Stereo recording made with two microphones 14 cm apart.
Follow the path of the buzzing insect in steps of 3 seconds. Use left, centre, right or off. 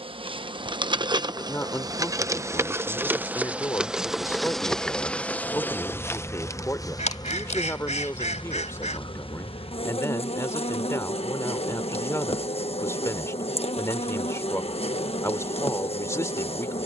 right, centre, left, left, left, left.